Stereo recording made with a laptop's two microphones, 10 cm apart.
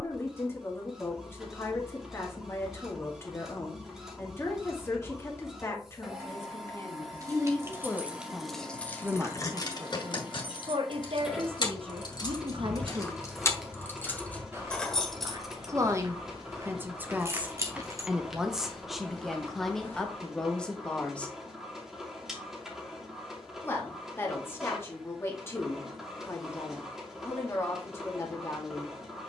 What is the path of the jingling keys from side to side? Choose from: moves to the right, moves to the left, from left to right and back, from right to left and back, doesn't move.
from right to left and back.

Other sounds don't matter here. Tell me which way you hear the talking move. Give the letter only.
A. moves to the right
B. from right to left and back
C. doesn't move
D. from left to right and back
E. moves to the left
D.